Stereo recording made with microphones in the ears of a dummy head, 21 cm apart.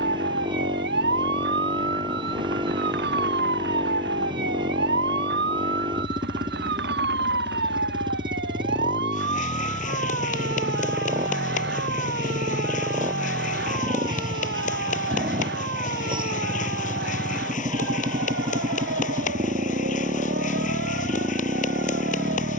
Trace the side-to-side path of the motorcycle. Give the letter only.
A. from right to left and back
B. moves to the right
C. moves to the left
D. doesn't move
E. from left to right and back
D.